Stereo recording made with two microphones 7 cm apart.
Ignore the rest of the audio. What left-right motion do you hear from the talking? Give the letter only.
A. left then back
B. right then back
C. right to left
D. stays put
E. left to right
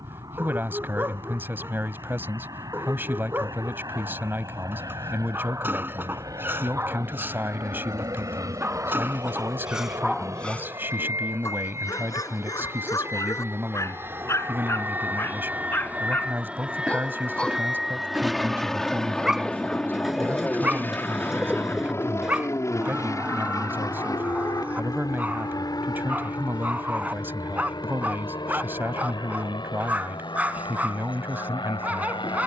D.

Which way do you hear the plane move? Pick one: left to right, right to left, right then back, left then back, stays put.
right to left.